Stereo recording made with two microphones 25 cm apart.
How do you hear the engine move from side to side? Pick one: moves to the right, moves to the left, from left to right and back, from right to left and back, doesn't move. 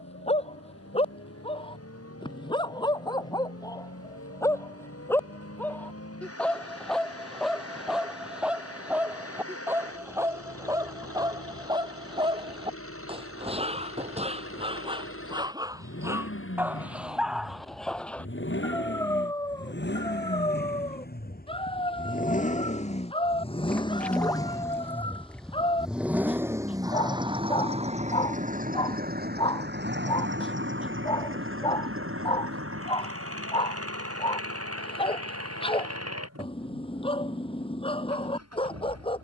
moves to the right.